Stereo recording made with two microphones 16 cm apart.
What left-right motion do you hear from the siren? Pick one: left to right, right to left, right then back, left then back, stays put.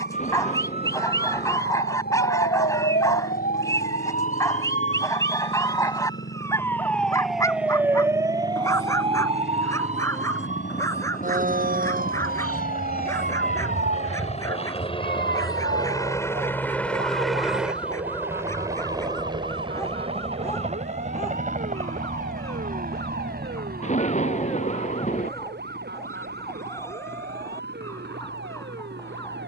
left to right.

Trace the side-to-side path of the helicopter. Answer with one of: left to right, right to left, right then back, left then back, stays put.
left to right.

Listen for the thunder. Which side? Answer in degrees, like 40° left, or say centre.
40° left.